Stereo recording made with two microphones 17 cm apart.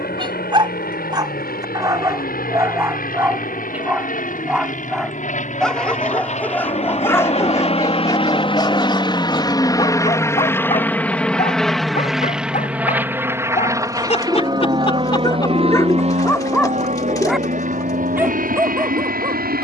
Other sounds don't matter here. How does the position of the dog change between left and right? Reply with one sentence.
You can hear the dog move from right to left and back again.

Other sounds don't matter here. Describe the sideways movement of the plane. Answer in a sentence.
You can hear the plane go from the left side to the right.